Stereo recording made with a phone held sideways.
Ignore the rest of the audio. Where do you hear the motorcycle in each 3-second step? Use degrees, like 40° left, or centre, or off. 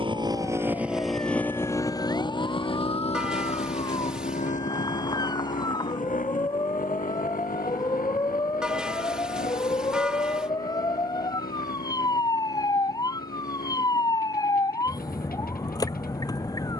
10° left, 50° left, 60° left, 70° left, 70° left, 70° left.